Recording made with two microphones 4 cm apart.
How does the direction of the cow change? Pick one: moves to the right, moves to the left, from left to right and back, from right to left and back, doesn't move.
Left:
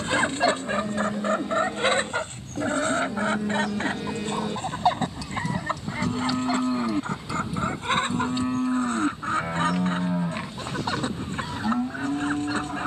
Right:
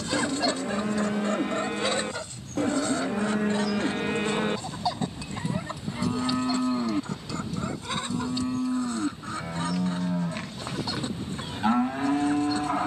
from right to left and back.